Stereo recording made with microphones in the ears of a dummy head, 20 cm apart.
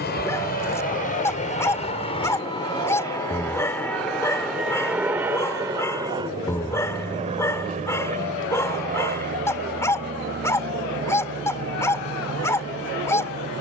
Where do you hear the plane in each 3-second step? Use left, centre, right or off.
left, centre, right, right, right.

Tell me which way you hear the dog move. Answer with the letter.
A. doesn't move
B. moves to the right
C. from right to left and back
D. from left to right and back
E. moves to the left
A.